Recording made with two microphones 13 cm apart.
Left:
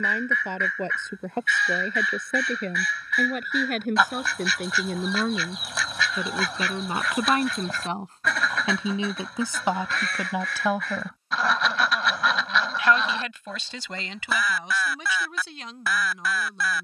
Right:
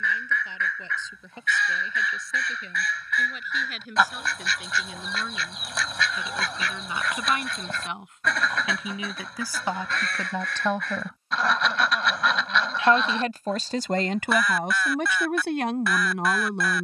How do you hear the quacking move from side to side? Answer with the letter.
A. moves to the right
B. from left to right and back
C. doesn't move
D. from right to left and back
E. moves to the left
C.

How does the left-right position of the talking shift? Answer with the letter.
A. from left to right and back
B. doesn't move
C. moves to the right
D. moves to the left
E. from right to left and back
C.